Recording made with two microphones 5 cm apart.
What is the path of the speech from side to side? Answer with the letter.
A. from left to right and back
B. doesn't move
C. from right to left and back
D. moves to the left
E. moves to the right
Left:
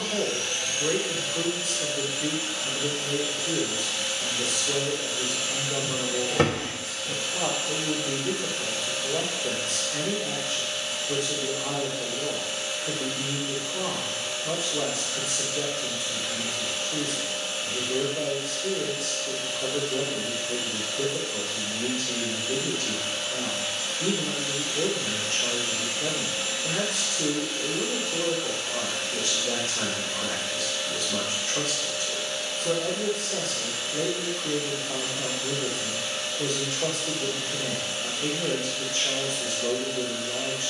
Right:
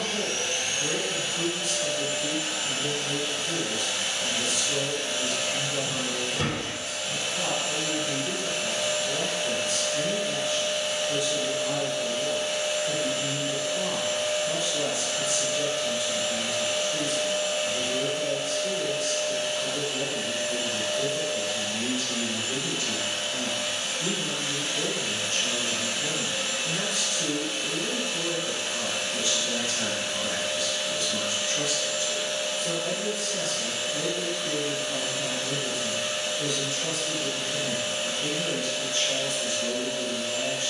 B.